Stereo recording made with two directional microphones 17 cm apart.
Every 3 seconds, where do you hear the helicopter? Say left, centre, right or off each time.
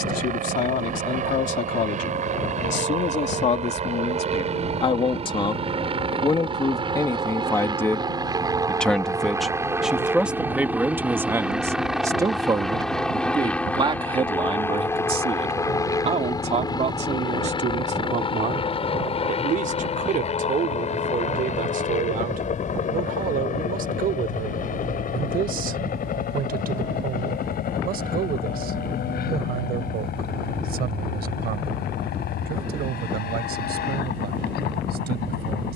right, right, right, centre, centre, left, left, left, left, left, left, left.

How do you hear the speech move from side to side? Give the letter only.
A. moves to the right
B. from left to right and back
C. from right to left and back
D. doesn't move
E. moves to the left
A.